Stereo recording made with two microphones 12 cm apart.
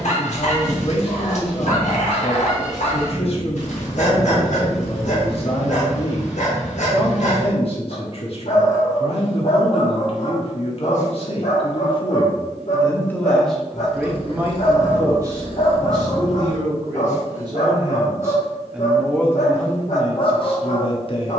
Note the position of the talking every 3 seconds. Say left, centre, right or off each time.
left, left, left, left, centre, right, left.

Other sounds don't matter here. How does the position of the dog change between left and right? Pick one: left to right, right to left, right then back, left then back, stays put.
stays put.